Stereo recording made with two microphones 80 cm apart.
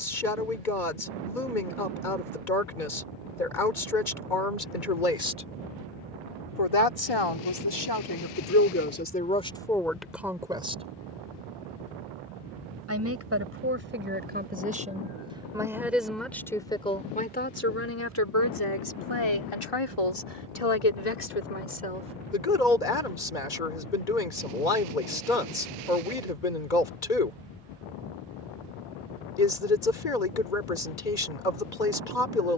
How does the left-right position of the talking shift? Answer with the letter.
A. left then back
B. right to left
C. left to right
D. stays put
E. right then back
E.